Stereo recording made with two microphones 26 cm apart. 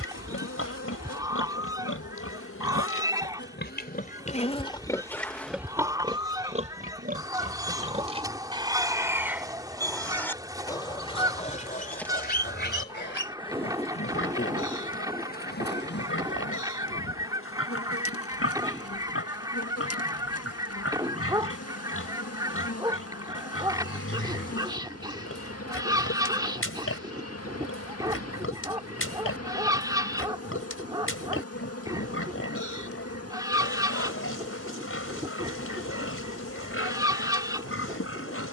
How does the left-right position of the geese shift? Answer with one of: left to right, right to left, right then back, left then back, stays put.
stays put.